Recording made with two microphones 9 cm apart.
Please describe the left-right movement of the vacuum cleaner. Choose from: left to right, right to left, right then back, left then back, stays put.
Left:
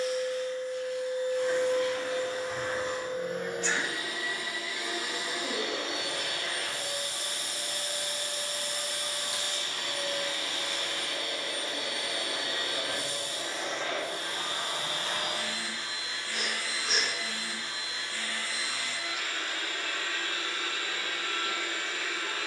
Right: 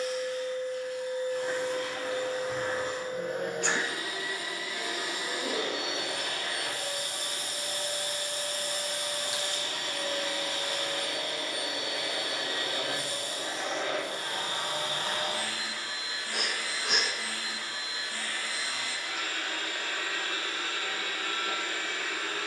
stays put.